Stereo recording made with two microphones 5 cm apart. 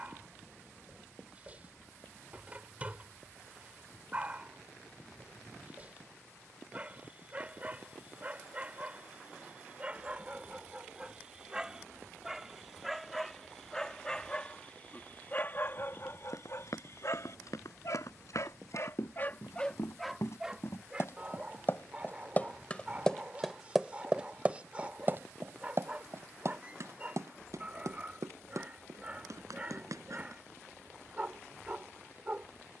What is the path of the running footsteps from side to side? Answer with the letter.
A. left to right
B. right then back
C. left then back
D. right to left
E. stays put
A.